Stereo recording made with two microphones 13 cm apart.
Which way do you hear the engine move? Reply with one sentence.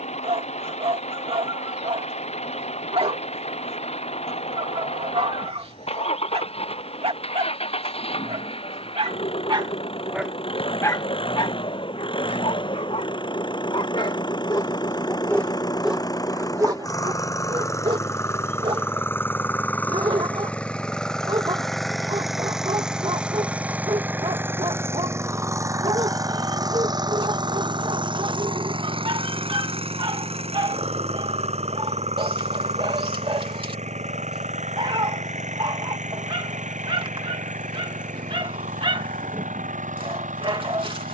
In this clip you hear the engine move to the right.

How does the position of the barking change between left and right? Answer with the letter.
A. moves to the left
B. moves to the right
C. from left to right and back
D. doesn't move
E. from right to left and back
E.